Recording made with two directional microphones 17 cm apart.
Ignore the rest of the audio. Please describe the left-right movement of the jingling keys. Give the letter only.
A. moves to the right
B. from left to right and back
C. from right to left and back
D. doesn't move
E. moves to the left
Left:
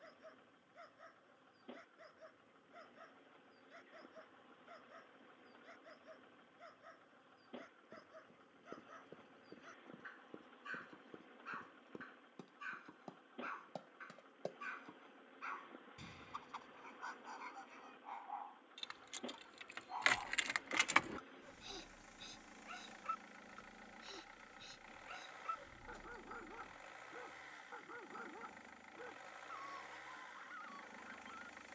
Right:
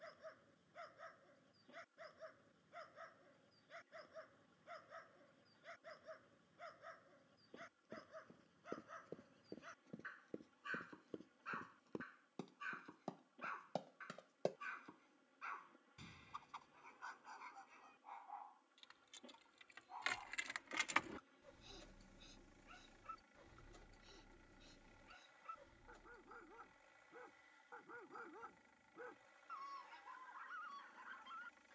B.